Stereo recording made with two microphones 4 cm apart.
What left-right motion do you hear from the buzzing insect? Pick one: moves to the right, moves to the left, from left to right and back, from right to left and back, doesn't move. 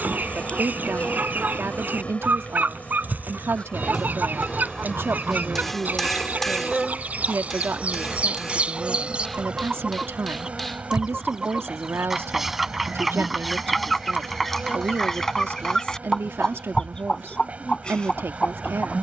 moves to the right.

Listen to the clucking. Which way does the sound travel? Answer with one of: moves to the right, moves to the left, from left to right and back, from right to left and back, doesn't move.
moves to the left.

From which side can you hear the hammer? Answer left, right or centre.
centre.